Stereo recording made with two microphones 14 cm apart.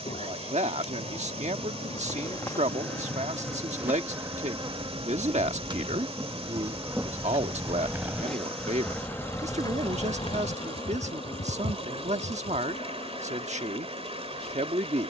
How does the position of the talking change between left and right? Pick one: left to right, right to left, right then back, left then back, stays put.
stays put.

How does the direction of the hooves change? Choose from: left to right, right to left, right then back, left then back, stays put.
right to left.